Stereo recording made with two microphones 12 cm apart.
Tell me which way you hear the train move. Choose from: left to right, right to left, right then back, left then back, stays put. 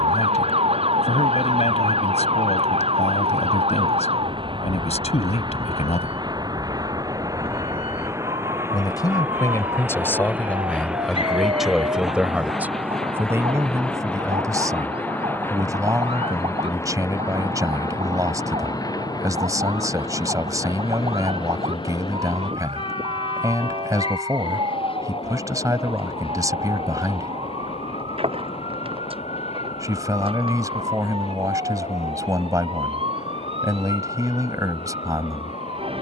right to left.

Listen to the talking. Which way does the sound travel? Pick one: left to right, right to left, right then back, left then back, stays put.
left to right.